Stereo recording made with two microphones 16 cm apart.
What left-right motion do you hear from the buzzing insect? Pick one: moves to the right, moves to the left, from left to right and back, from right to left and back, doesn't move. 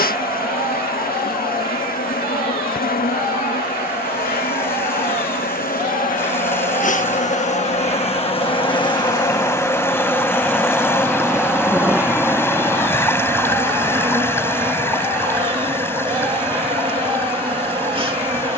moves to the right.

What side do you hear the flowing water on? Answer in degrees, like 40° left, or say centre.
20° left.